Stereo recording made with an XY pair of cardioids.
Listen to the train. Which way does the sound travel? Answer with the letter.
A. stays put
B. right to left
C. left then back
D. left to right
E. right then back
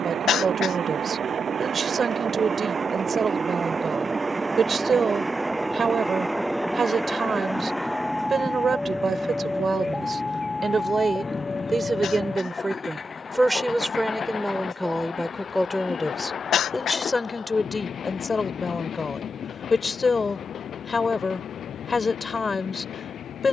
B.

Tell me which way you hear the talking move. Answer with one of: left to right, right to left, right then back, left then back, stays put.
right to left.